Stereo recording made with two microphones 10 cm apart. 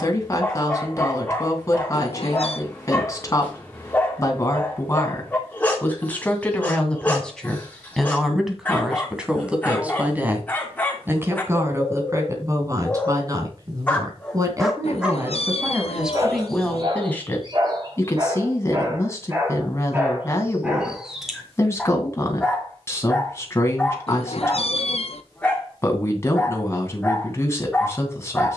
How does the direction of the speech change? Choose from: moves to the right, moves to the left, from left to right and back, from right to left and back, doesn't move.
from left to right and back.